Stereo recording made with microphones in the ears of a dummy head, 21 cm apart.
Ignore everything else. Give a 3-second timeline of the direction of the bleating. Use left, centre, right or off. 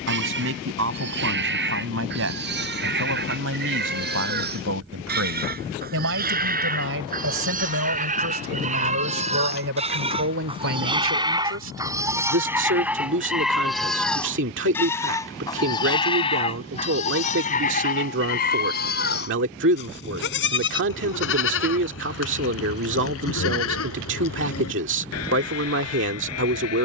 right, right, right, right, centre, left, left, left, left.